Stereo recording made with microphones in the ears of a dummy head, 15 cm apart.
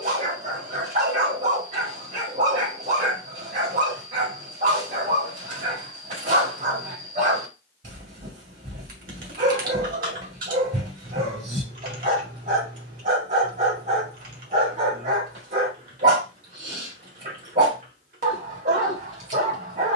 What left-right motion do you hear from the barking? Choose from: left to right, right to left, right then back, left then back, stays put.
stays put.